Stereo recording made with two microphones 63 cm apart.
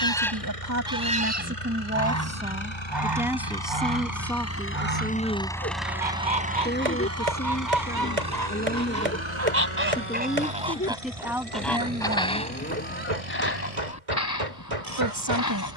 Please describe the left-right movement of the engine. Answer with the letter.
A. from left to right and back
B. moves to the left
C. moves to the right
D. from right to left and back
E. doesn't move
C.